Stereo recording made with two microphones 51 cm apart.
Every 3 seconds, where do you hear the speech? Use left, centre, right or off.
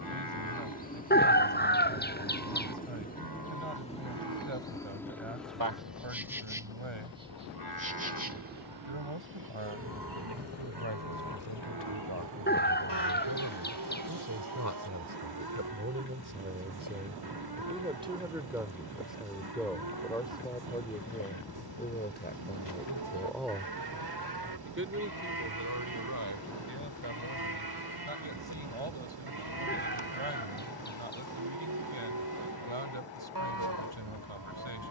right, right, right, right, right, right, centre, centre, right, right, right, right.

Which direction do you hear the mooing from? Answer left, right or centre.
right.